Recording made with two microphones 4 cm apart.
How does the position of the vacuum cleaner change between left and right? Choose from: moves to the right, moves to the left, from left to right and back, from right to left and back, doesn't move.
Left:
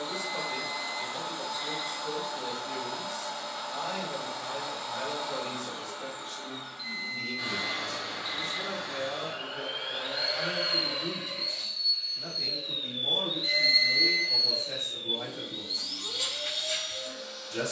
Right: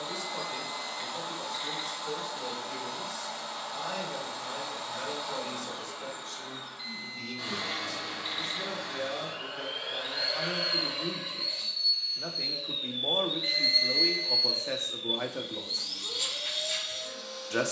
doesn't move.